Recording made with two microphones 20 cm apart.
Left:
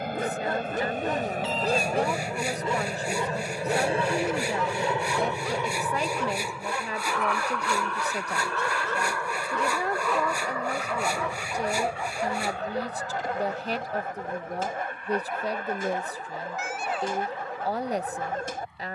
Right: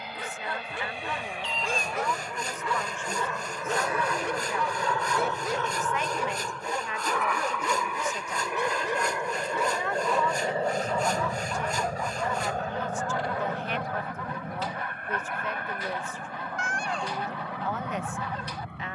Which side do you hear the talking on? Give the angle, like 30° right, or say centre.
40° left.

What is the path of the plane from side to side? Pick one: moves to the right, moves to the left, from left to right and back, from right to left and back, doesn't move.
moves to the right.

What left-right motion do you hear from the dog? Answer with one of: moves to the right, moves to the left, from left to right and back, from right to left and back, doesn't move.
from left to right and back.